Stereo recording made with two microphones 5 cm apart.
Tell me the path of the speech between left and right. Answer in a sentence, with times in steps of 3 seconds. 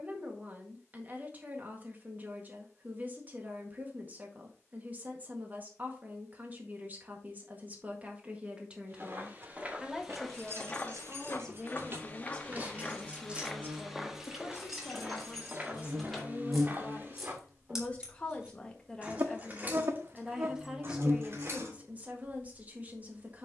In this clip you hear the speech on the right from 0 s, in the centre from 9 s, on the left from 12 s, in the centre from 18 s and on the right from 21 s.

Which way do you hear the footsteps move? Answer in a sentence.
You can hear the footsteps move from right to left and back again.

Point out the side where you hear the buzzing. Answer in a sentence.
You can hear the buzzing on the right.